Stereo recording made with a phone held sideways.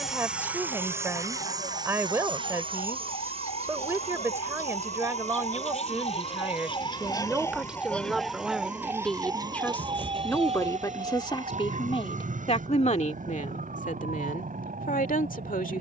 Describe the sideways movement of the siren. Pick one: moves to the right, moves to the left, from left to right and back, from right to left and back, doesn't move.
moves to the right.